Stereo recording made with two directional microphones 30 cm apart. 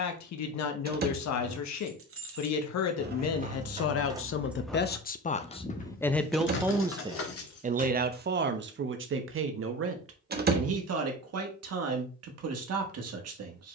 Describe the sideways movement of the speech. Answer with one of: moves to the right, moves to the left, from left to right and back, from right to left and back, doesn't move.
moves to the right.